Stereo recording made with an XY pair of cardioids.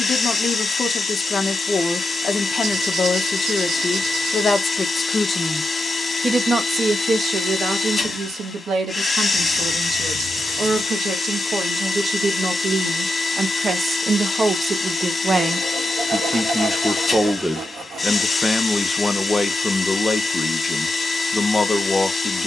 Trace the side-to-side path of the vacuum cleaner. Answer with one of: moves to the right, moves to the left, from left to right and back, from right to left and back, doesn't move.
doesn't move.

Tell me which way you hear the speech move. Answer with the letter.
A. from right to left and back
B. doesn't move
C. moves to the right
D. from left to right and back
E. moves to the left
D.